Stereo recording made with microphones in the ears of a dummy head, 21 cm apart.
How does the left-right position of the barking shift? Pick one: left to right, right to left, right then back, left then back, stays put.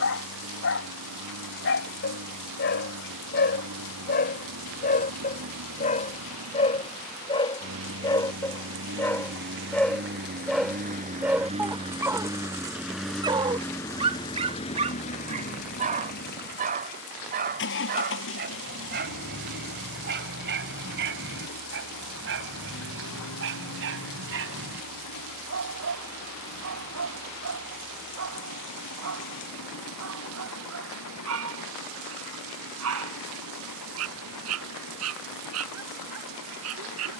left to right.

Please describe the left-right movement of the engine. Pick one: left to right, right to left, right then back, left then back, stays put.
right to left.